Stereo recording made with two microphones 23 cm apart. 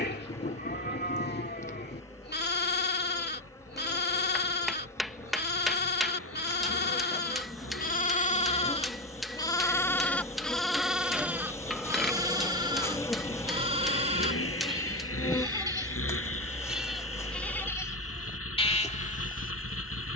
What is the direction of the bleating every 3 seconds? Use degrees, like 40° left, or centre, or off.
50° left, 50° left, 40° left, centre, 20° right, centre, 30° left.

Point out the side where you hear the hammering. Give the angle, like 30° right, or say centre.
centre.